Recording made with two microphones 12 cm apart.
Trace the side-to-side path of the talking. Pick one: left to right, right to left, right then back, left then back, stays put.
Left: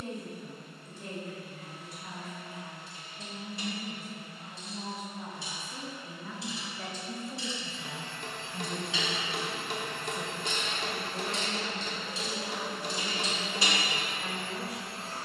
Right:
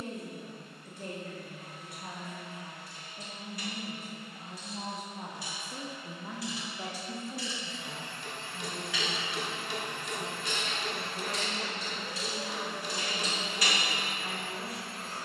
right to left.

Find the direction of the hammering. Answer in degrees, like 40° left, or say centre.
50° left.